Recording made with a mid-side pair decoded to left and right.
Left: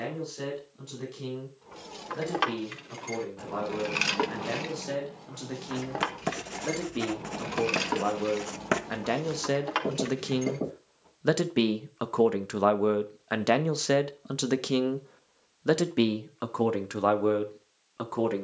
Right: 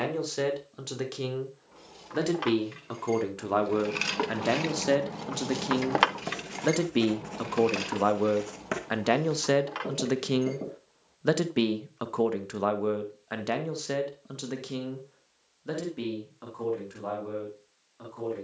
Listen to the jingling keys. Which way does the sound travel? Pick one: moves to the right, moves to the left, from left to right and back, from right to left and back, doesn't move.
from left to right and back.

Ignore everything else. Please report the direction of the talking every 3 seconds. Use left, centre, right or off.
right, right, right, centre, left, left.